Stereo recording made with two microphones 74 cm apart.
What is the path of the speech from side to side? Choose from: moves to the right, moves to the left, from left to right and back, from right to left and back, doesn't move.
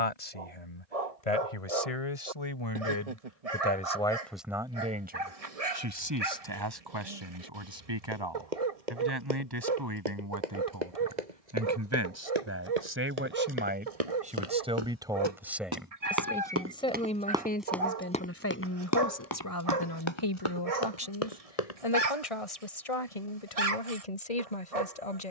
from left to right and back.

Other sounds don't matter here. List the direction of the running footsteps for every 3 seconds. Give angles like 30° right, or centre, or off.
off, off, 70° right, 60° right, 50° right, 10° right, 30° left, 50° left, off.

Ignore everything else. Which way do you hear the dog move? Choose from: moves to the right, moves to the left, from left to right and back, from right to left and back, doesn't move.
doesn't move.